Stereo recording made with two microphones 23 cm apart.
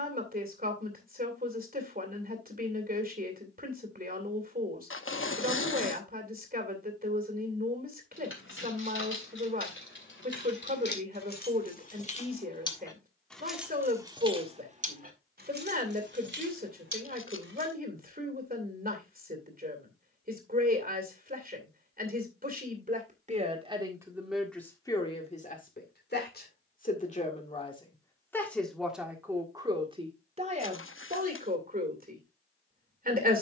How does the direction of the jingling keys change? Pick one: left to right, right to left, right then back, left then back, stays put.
left to right.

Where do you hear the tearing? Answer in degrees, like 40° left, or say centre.
60° left.